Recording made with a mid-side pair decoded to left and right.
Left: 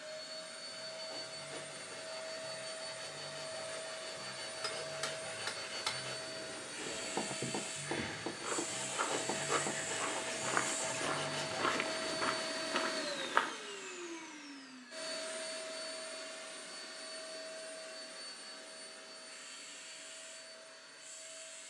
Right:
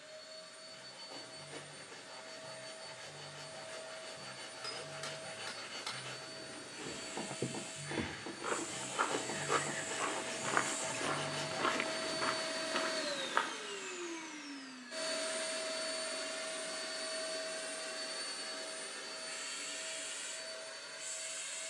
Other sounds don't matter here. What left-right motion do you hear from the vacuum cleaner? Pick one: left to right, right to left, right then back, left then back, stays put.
left to right.